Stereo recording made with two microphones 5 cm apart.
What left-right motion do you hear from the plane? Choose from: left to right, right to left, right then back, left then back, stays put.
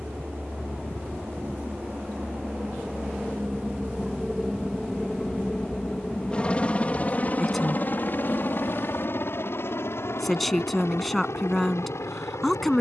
right to left.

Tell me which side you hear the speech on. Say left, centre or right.
centre.